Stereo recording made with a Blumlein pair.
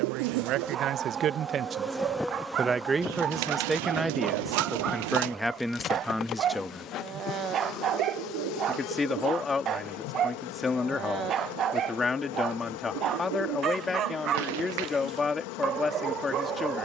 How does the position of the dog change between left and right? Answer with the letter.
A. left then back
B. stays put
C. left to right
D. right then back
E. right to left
B.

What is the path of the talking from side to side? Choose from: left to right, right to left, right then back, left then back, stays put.
right to left.